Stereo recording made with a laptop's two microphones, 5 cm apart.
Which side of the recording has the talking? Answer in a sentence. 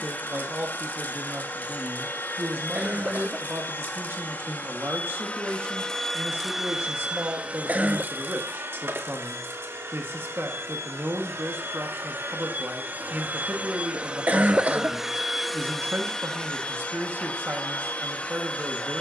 You can hear the talking on the right.